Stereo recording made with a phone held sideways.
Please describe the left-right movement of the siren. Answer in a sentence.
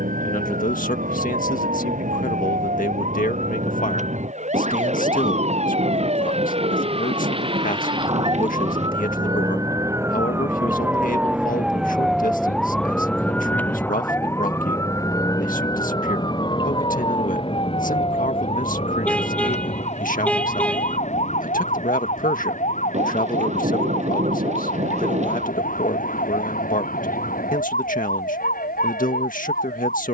In this clip you hear the siren move to the left.